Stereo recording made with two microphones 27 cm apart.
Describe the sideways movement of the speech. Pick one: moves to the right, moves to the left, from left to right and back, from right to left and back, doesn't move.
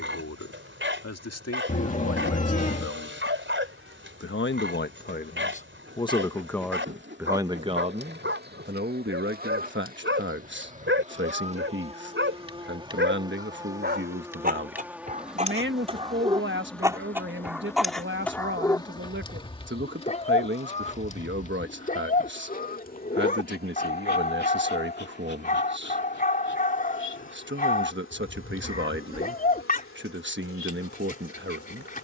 moves to the right.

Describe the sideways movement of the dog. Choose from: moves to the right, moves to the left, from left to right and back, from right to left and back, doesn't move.
moves to the left.